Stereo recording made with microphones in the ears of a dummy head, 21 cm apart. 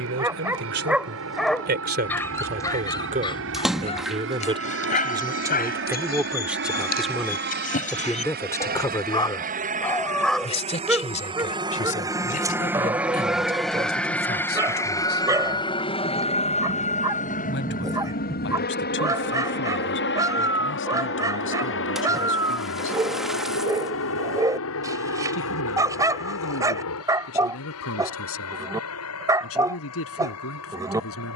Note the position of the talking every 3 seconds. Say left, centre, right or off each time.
right, right, centre, left, left, left, left, left, left, left, left.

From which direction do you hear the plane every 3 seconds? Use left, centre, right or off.
right, right, right, right, centre, left, left, left, left, left, left.